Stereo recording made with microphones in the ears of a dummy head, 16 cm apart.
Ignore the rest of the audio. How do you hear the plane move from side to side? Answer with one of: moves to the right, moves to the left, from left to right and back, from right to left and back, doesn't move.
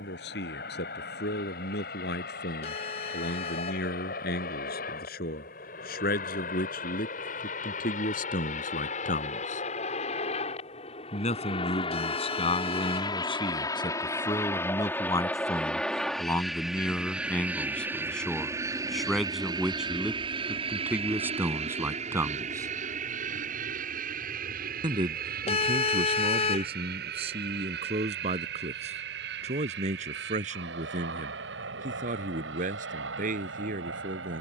moves to the right.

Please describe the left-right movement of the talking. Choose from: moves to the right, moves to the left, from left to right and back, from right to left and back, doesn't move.
moves to the right.